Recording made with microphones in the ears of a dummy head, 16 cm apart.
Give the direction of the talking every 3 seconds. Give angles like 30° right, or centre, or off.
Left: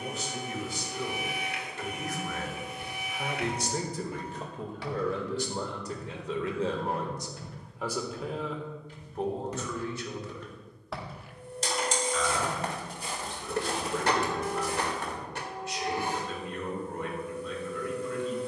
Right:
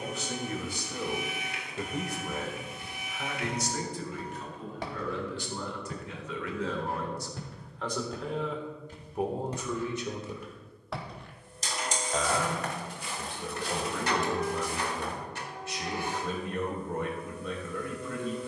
40° right, 40° left, 20° left, 20° right, 50° right, 50° right.